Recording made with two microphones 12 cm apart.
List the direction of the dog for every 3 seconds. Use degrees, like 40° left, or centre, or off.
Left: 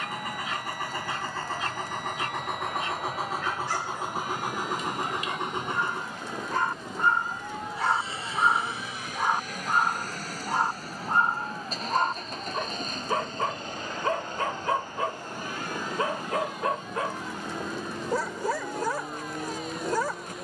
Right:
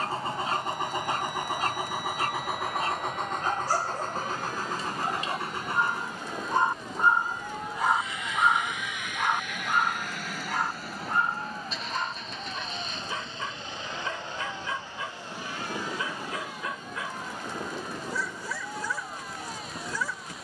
40° right, 30° right, 10° right, 30° left, 50° left, 50° left, 50° left.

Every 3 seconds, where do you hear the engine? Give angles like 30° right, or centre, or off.
10° right, 10° left, 30° left, 40° left, 40° left, 50° left, 50° left.